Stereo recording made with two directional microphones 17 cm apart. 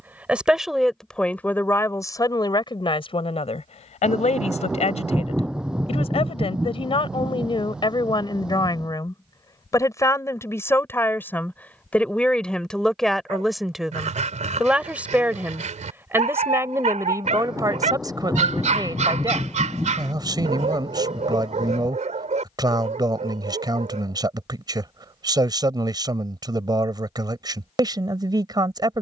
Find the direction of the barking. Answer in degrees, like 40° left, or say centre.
40° right.